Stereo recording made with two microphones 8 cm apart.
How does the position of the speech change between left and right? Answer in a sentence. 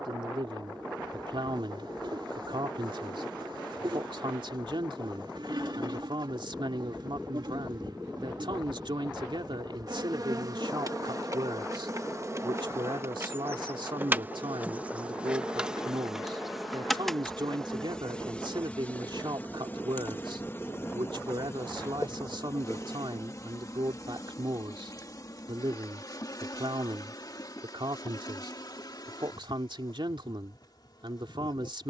You can hear the speech stay in one place.